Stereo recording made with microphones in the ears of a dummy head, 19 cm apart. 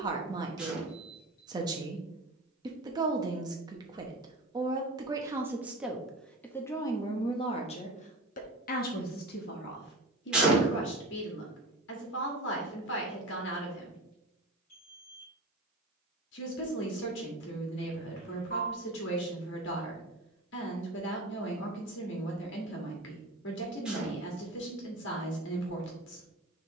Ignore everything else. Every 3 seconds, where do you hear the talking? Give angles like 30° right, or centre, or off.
20° right, 20° right, 30° left, 50° left, 60° left, 60° left, 60° left, 60° left, 60° left.